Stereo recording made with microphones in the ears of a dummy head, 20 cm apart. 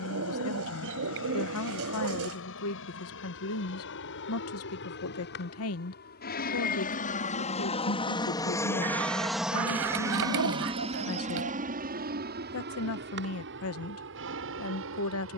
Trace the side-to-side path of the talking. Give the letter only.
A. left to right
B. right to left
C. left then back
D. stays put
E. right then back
D.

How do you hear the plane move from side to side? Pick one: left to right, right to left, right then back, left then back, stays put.
left to right.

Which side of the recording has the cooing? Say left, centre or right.
right.